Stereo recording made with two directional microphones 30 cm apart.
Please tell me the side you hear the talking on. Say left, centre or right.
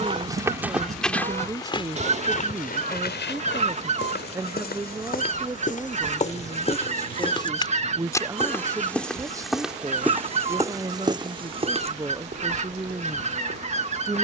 centre.